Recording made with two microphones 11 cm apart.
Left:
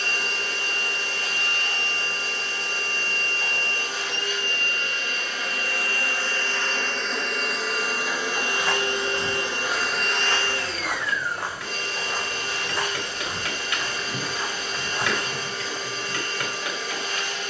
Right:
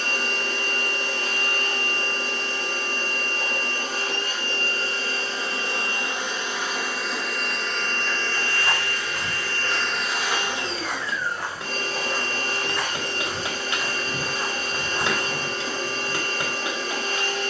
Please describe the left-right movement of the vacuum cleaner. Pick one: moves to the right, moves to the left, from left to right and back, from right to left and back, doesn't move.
from right to left and back.